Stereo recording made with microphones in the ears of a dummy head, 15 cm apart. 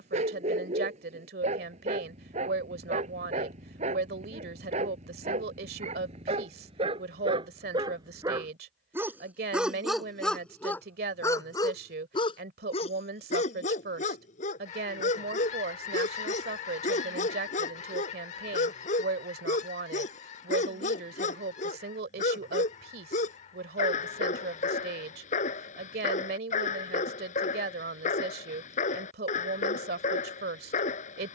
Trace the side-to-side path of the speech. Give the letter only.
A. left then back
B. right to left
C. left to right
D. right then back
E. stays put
E.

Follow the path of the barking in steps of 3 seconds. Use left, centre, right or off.
right, right, right, centre, left, left, left, left, left, left, left.